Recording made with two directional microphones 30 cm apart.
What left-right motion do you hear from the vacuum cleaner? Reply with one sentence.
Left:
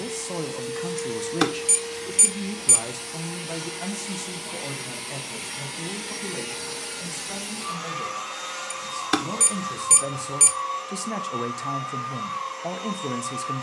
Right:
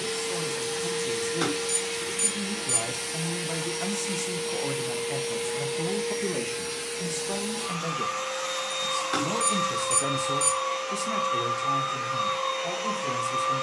In this clip you hear the vacuum cleaner go left and come back.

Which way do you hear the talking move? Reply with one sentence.
In this clip you hear the talking go right and come back.